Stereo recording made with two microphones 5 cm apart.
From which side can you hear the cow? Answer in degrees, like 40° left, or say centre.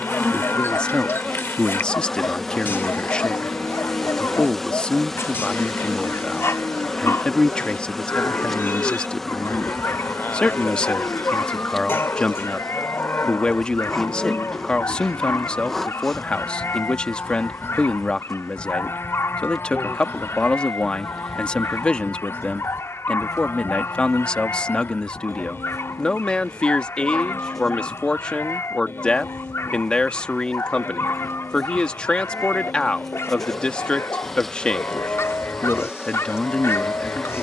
60° left.